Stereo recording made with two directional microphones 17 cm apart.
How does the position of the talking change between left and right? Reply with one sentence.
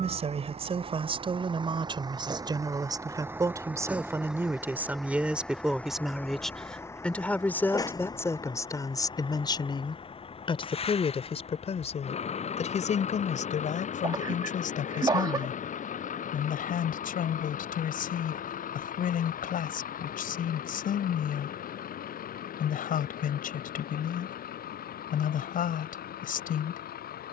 In this clip you hear the talking move from right to left.